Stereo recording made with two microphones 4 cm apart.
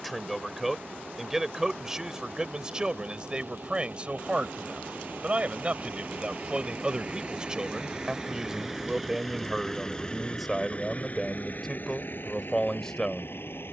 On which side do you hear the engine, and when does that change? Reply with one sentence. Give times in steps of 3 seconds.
In this clip you hear the engine on the right from 0 s and on the left from 9 s.